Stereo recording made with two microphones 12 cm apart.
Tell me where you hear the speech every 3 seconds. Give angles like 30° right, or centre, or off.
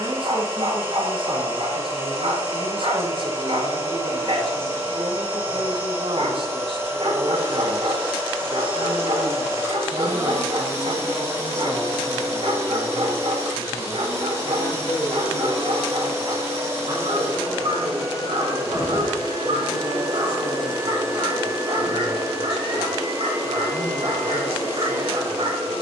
50° right, 50° right, 50° right, 10° right, 30° left, 50° left, 60° left, 60° left, 60° left.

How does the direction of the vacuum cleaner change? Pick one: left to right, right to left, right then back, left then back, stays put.
stays put.